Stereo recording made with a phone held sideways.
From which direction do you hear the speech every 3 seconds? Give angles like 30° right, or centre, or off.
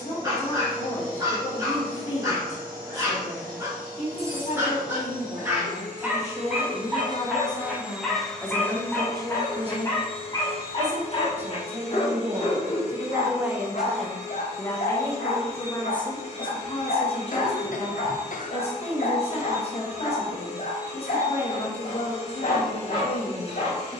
50° left, 50° left, 20° left, 40° right, 10° right, 30° left, 40° left, 40° left.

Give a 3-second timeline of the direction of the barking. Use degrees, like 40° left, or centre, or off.
20° right, 20° right, centre, 30° left, 50° left, 80° left, 80° left, 80° left.